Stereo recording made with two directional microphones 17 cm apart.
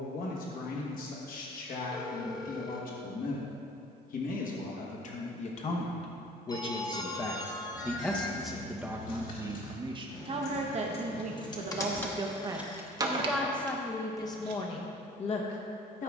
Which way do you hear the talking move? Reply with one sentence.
In this clip you hear the talking go right and come back.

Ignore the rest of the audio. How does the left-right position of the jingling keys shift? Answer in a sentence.
In this clip you hear the jingling keys move to the right.